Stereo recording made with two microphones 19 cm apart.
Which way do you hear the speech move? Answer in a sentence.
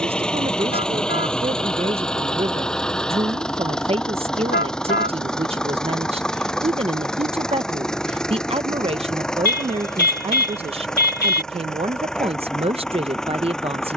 In this clip you hear the speech stay put.